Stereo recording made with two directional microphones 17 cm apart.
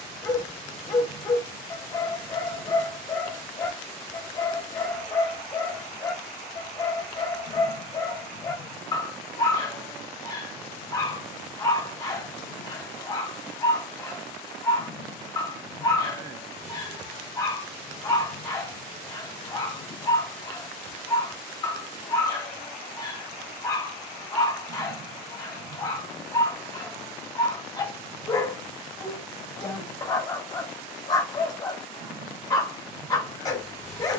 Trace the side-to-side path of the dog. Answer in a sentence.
In this clip you hear the dog stay in one place.